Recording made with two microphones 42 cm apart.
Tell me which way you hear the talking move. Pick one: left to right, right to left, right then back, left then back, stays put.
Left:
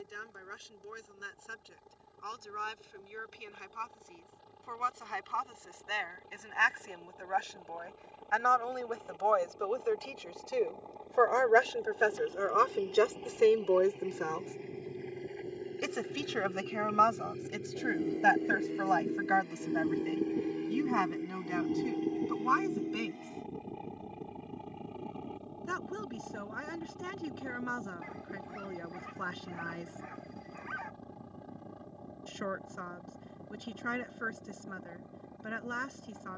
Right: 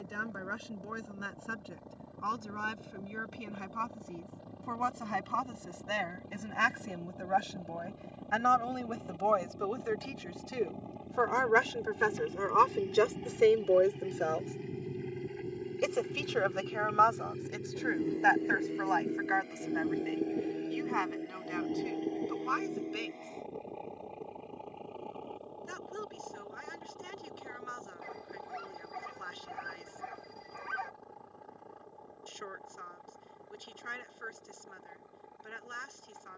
right to left.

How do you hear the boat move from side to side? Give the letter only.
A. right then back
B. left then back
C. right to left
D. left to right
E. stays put
C.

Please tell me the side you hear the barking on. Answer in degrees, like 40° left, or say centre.
80° right.